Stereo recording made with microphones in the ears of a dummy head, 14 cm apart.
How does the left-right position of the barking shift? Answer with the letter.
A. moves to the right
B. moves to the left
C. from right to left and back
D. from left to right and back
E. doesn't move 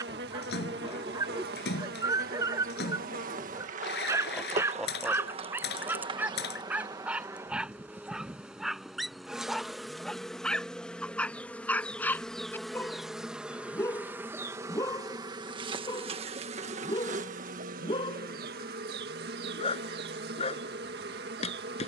B.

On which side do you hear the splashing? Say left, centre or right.
left.